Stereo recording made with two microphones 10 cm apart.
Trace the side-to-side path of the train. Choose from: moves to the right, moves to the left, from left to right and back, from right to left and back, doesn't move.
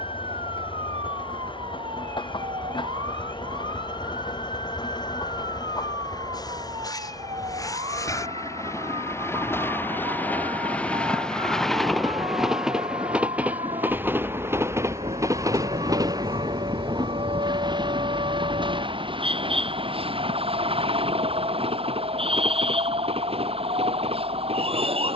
moves to the right.